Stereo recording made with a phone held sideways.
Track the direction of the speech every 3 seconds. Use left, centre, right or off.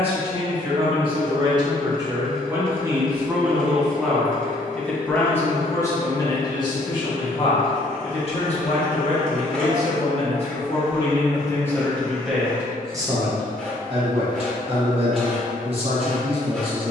right, centre, left, left, right, right.